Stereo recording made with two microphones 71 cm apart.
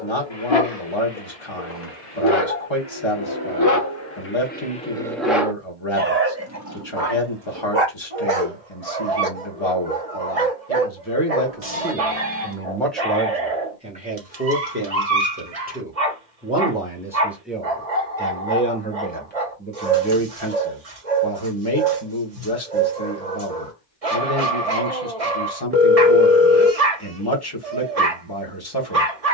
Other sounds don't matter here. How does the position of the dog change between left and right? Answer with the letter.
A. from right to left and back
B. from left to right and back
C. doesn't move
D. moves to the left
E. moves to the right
E.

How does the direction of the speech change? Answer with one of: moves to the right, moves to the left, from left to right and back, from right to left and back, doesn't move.
from left to right and back.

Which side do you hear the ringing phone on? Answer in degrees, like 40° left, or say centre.
20° right.